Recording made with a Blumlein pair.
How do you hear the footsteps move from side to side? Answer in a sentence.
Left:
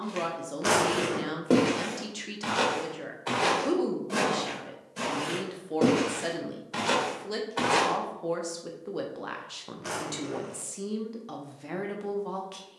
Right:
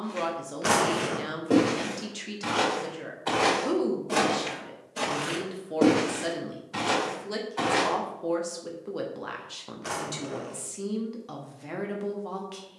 In this clip you hear the footsteps move from left to right and back again.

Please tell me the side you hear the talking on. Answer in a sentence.
In this clip you hear the talking in the centre.